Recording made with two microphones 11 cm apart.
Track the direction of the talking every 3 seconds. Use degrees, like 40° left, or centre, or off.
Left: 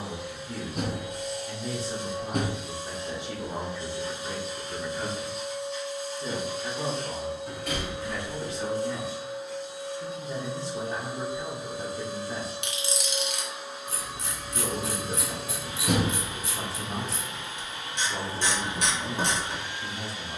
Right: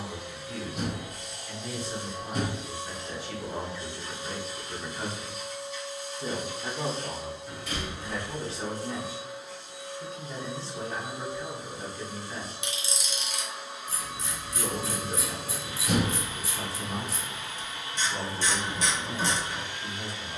30° left, 10° left, 30° right, 20° left, 30° left, 30° left, 30° left.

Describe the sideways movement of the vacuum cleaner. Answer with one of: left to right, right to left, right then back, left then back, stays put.
stays put.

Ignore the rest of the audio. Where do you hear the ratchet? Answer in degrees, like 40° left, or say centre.
60° left.